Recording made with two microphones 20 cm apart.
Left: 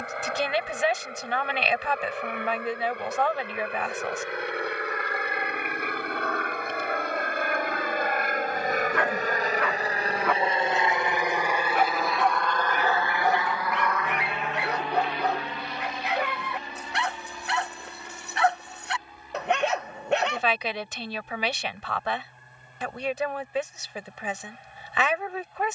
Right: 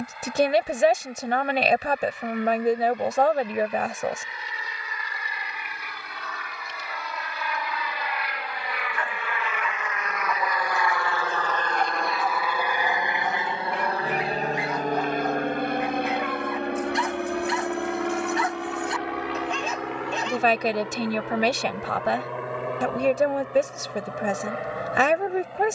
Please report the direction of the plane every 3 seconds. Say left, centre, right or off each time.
left, left, left, left, right, right, right, right, right.